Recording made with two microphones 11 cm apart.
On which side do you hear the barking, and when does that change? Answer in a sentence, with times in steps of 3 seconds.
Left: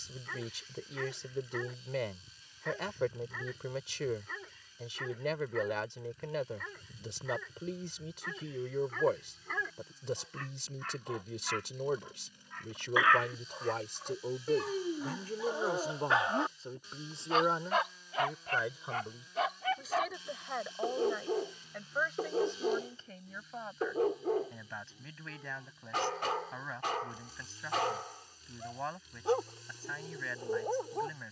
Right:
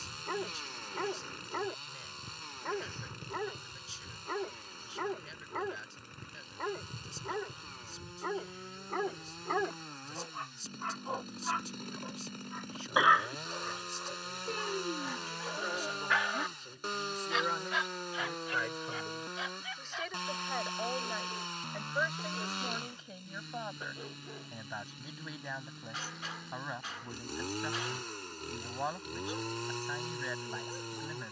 In this clip you hear the barking on the right from 0 s, in the centre from 12 s and on the left from 15 s.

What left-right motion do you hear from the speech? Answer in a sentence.
You can hear the speech travel towards the right.